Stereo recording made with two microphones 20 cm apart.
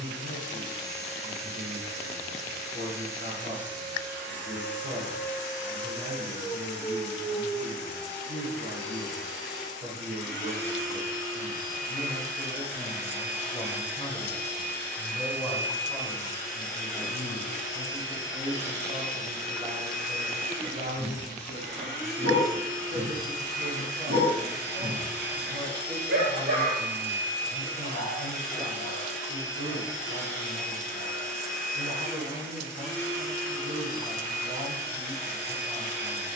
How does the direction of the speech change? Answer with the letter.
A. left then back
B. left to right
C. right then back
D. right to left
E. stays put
A.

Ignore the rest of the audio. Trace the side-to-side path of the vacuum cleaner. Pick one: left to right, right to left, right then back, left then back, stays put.
stays put.